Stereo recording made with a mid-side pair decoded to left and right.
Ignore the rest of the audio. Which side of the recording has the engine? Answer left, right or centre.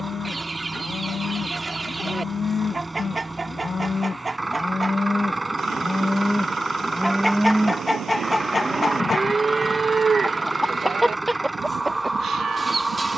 centre.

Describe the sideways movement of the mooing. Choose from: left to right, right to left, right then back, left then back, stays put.
left to right.